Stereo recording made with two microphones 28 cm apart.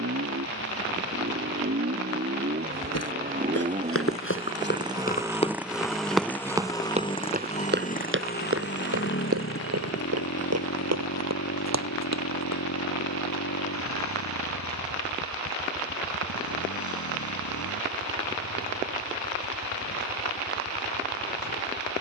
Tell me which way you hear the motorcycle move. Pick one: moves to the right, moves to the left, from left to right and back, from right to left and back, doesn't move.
moves to the left.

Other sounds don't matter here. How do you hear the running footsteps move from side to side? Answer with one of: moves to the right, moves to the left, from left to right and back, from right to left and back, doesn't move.
moves to the right.